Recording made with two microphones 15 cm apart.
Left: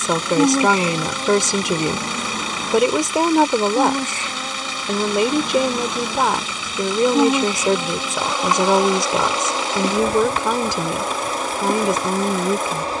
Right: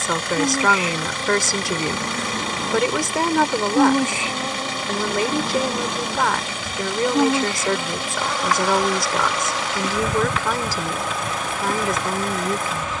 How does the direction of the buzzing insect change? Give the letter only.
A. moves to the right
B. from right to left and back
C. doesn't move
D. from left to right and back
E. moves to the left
D.